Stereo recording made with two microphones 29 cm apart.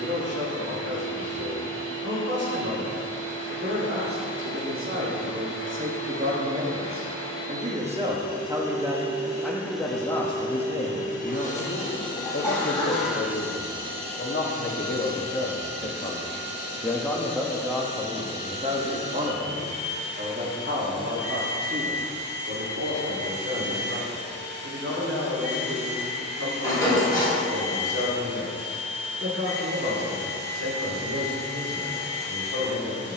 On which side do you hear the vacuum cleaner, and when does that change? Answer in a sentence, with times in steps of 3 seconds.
In this clip you hear the vacuum cleaner on the right from 0 s, in the centre from 9 s and on the right from 15 s.